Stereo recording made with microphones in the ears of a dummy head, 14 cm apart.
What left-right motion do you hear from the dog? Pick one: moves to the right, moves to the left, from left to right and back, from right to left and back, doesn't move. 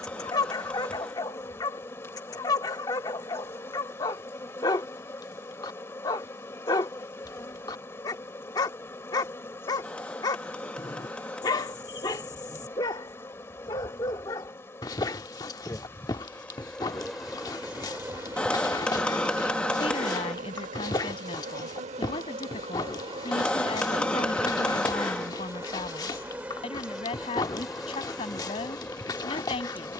doesn't move.